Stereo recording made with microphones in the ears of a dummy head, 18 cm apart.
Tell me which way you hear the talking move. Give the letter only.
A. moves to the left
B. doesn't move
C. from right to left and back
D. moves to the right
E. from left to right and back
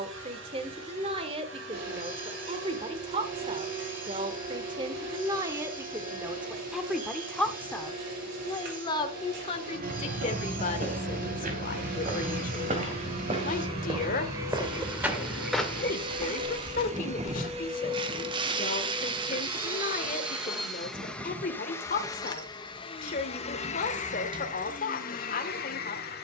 A.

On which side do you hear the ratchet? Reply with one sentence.
In this clip you hear the ratchet on the right.